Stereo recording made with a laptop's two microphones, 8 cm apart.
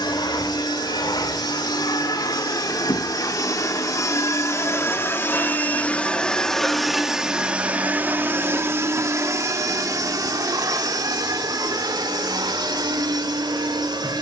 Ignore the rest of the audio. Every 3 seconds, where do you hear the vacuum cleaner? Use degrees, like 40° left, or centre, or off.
60° left, 40° left, 10° right, 50° right, 70° right.